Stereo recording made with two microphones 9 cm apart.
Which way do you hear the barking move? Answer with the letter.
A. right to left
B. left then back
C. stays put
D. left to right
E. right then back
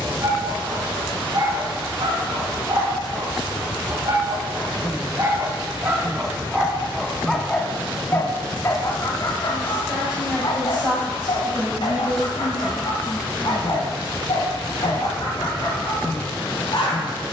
A.